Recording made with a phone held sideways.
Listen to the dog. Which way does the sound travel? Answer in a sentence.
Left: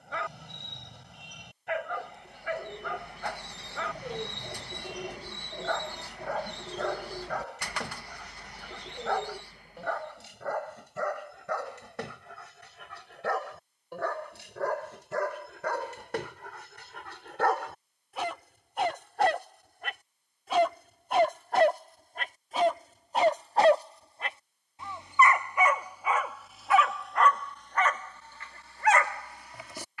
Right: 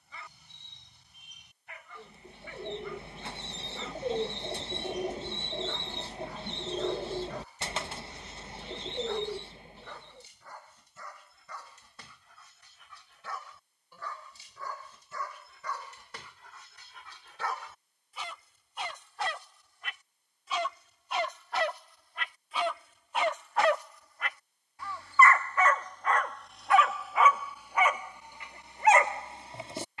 You can hear the dog go from the left side to the right.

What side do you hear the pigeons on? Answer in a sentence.
You can hear the pigeons on the right.